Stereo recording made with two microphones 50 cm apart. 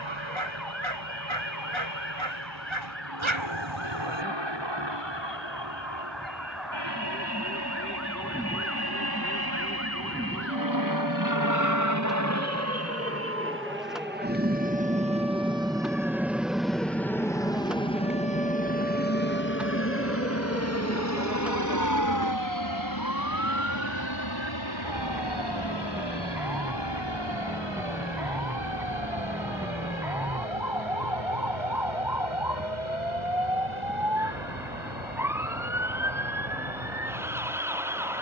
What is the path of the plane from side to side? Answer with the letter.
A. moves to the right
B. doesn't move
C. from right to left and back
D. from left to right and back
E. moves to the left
E.